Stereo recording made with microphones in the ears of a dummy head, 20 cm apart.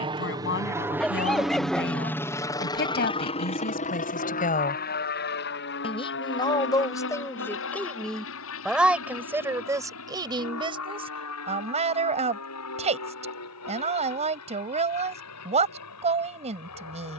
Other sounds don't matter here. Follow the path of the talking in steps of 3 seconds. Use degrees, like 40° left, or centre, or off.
60° left, 40° left, 10° left, 20° right, 30° right, 30° right.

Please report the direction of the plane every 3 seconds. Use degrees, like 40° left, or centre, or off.
centre, 40° left, 60° left, 70° left, 70° left, 80° left.